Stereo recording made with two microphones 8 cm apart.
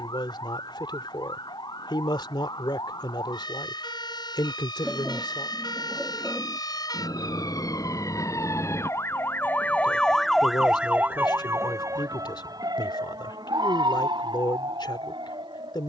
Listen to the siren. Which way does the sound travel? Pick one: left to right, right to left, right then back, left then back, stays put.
left to right.